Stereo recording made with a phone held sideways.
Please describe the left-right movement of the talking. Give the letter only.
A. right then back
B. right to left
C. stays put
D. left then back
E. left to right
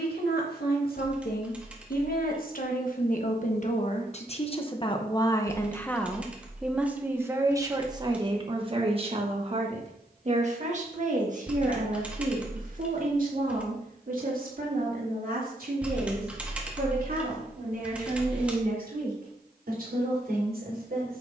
E.